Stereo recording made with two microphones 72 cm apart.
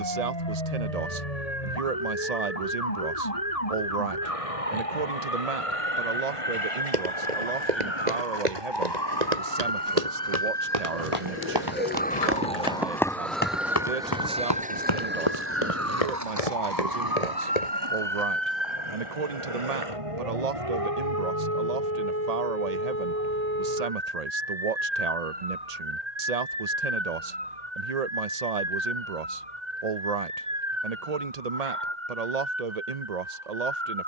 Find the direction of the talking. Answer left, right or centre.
right.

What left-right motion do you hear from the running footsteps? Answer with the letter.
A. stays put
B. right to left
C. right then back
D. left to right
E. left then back
B.